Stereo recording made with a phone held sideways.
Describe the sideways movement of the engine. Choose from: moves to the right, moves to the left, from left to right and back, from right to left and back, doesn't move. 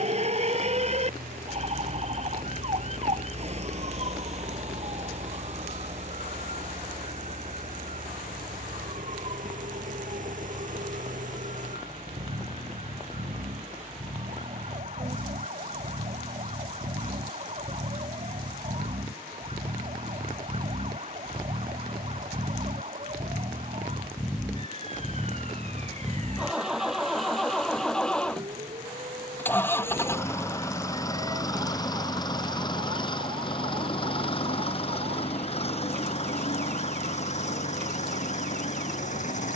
moves to the left.